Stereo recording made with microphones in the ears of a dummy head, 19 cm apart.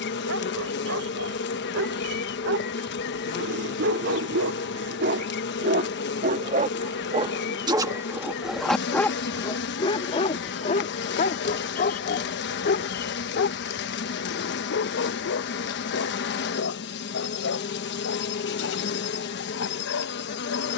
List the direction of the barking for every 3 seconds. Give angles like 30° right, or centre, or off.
70° right, 60° right, 20° right, 30° left, 60° left, 70° left, 70° left.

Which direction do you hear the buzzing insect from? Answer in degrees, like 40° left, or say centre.
60° left.